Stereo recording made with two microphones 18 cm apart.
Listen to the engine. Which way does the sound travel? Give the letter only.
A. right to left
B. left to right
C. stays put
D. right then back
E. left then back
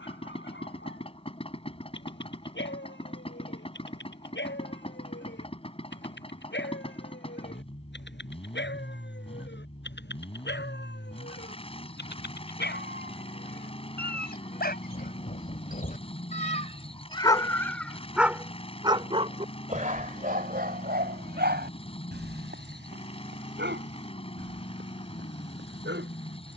C.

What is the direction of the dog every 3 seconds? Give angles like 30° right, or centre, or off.
80° left, 80° left, 80° left, 70° left, 60° left, 30° left, 40° right, 70° right, 80° right.